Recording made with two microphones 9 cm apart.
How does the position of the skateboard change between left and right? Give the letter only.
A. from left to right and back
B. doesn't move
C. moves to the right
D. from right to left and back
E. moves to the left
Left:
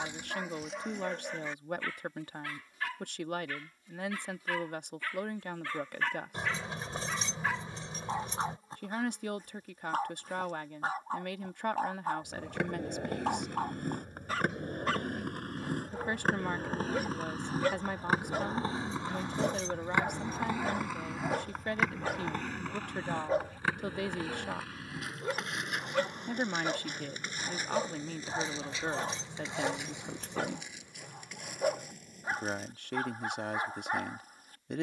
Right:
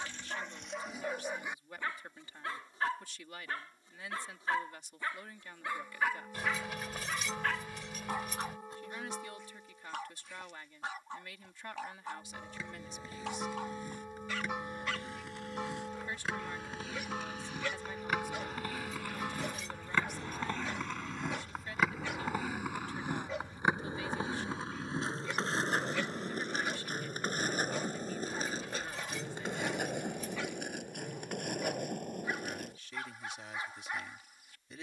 C.